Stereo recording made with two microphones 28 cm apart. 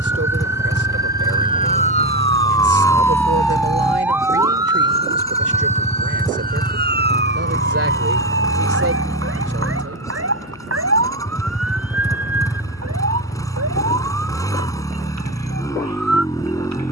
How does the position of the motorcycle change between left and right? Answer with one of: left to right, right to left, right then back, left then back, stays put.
stays put.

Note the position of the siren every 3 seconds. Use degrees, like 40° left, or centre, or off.
30° left, 10° right, 40° right, 50° right, 60° right, 60° right.